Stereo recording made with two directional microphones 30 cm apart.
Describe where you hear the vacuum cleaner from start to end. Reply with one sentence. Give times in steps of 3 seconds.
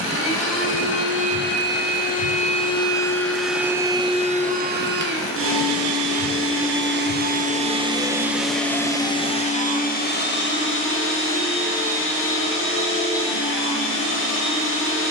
You can hear the vacuum cleaner on the left from 0 s, on the right from 3 s and on the left from 9 s.